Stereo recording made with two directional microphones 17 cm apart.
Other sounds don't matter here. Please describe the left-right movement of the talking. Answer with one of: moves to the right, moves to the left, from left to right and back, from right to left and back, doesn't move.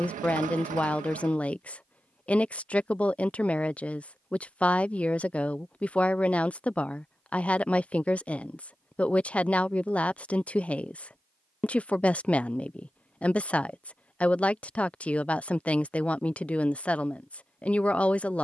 doesn't move.